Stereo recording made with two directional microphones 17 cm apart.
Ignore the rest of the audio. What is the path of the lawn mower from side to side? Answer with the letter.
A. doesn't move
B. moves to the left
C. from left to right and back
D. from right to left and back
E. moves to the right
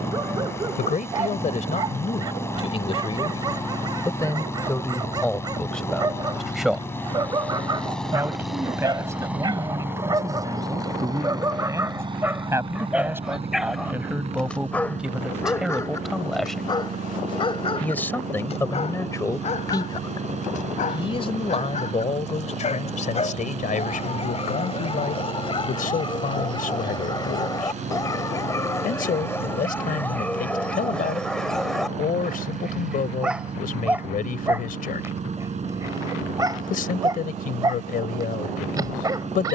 E.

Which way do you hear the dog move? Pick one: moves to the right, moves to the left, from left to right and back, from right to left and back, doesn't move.
from right to left and back.